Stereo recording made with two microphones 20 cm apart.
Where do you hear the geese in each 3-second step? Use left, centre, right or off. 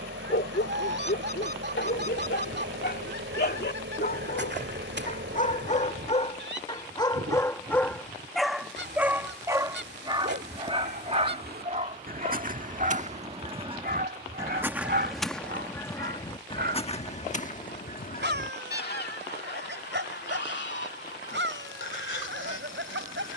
right, right, right, right, right, left, left, left.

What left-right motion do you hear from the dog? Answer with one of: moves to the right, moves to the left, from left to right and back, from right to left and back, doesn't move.
moves to the right.